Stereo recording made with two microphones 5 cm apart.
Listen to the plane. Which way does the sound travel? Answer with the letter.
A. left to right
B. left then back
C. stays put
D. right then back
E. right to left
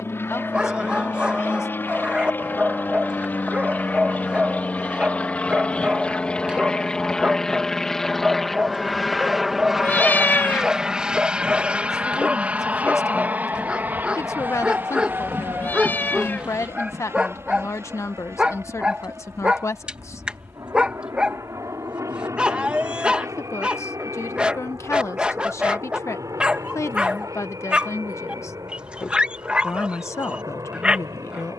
A.